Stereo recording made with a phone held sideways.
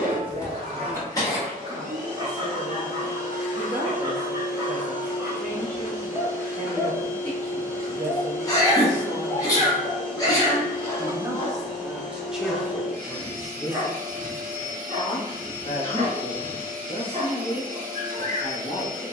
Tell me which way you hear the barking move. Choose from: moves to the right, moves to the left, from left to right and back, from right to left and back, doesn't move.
from right to left and back.